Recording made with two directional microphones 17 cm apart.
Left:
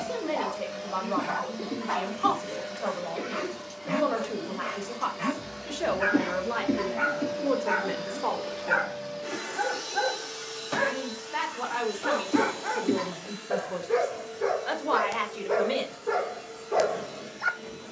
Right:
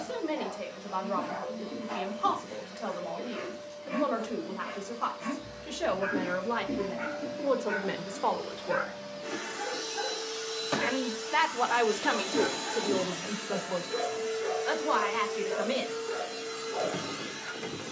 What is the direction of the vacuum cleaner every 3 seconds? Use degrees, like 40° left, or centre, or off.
50° left, 50° left, 30° left, 10° right, 40° right, 60° right.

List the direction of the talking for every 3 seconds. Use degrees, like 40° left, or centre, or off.
20° left, 10° left, centre, 30° right, 10° right, 10° left.